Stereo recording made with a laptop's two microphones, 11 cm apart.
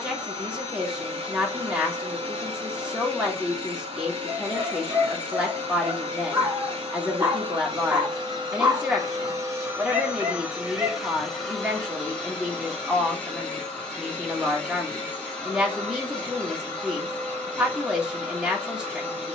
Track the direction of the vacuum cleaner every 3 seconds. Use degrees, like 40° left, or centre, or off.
50° right, 50° right, 50° right, 10° right, 10° left, 10° left, 10° left.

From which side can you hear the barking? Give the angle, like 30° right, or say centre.
20° right.